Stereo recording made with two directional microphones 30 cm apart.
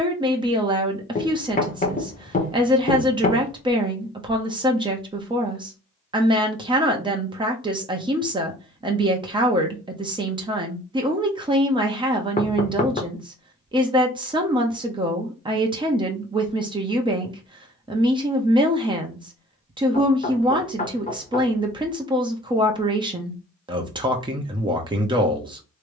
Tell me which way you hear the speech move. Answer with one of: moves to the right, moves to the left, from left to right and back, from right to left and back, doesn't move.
doesn't move.